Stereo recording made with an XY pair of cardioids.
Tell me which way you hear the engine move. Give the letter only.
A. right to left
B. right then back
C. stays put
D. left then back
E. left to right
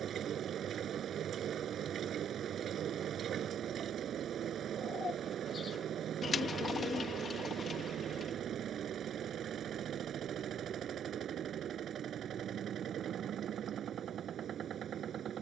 C.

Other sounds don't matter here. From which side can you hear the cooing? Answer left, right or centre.
left.